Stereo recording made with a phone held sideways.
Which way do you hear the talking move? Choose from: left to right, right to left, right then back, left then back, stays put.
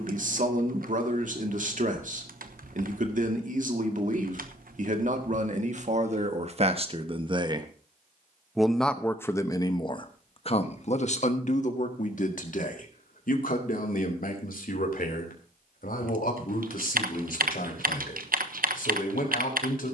right to left.